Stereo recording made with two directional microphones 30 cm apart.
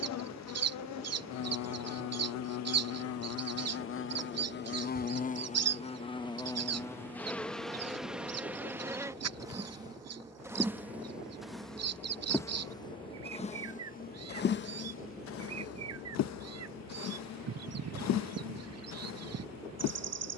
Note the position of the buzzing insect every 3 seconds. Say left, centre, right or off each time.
left, left, centre, centre, left, left, left.